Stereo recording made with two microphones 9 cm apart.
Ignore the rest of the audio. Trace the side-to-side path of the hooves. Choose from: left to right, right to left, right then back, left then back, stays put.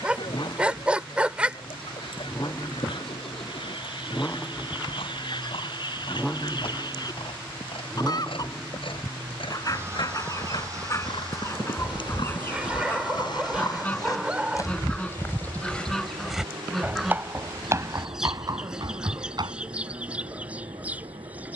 left to right.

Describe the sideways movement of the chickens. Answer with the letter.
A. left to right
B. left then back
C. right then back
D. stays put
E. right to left
A.